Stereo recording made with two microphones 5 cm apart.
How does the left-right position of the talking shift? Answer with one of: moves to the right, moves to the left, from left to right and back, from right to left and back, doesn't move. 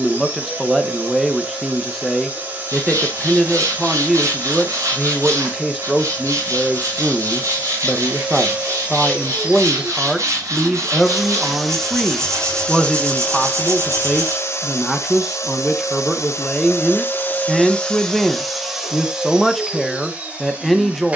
doesn't move.